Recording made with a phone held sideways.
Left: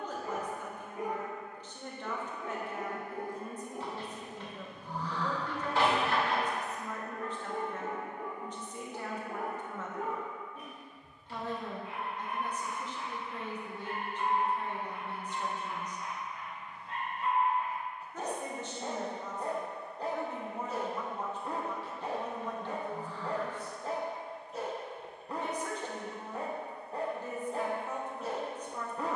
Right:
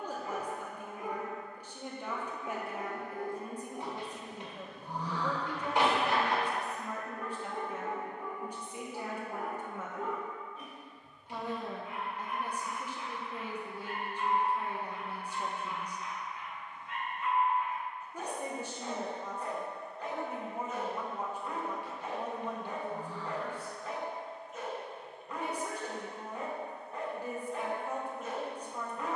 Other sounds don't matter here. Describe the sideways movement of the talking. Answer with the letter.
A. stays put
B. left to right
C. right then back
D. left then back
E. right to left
A.